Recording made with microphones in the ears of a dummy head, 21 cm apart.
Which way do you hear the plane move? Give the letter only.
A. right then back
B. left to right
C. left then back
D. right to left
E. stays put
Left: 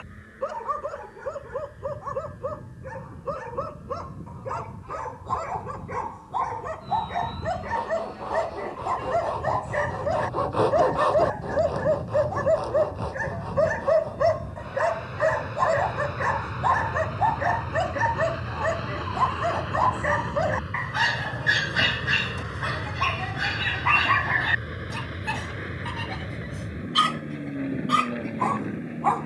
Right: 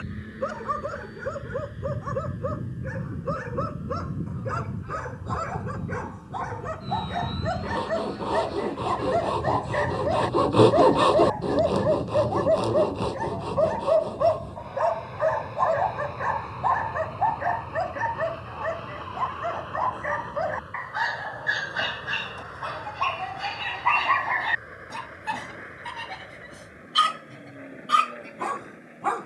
D.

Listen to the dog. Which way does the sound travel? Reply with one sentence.
You can hear the dog move from right to left and back again.